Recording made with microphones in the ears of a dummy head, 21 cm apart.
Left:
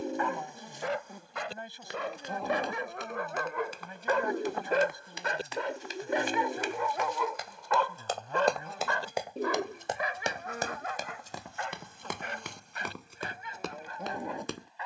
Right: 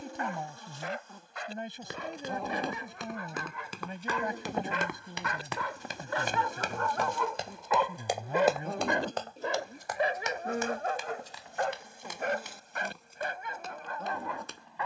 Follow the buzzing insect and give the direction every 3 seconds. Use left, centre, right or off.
centre, right, right, right, centre.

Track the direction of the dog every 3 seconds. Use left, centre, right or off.
left, left, centre, right, right.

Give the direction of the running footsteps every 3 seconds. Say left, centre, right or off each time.
right, right, right, left, left.